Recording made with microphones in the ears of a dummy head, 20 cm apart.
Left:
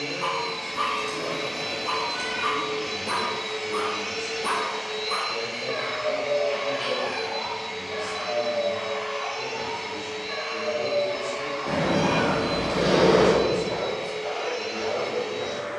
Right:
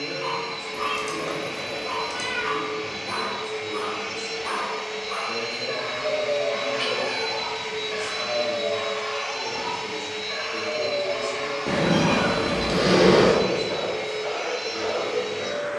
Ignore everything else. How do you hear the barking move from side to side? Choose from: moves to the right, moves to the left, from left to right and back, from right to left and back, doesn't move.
moves to the right.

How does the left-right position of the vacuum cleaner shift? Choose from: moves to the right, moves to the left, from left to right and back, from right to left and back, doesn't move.
moves to the right.